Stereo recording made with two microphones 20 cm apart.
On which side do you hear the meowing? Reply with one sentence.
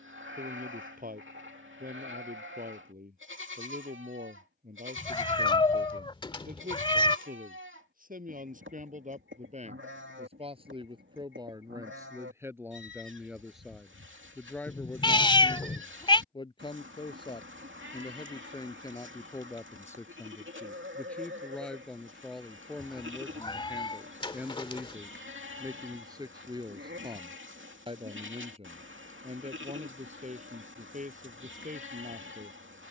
In this clip you hear the meowing on the left.